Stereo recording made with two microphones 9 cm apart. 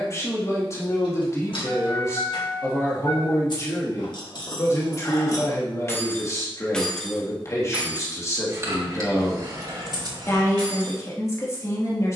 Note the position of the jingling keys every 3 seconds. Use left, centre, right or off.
left, left, centre, right.